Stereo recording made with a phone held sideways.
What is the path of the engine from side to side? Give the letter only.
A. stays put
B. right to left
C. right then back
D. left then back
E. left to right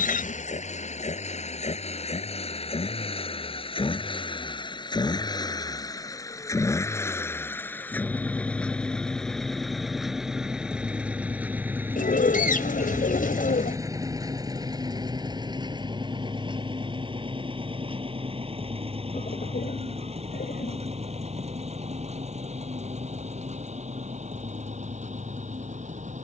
E.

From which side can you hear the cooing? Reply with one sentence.
In this clip you hear the cooing on the left.